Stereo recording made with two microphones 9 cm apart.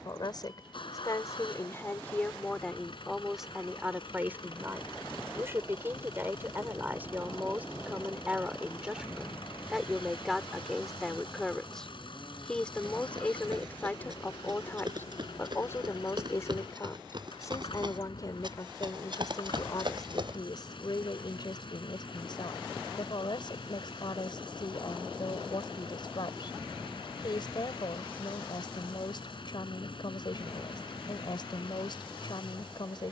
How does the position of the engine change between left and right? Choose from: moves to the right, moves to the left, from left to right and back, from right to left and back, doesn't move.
doesn't move.